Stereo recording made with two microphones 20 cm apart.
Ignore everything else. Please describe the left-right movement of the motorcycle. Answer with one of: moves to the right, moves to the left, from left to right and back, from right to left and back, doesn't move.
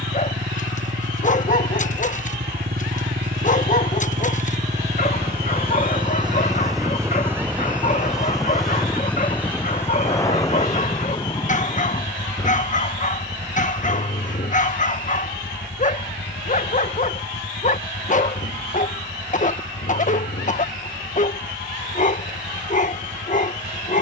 moves to the left.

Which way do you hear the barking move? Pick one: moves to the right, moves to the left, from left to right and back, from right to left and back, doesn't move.
doesn't move.